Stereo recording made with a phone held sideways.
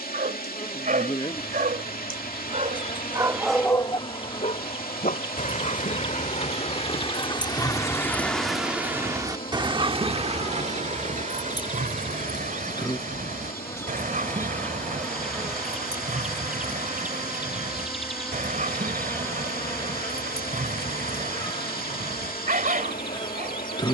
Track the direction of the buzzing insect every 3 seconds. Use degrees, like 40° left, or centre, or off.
30° left, 30° left, 30° left, 30° left, 20° left, centre, 20° left, 30° left.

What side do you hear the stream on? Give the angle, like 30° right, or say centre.
70° left.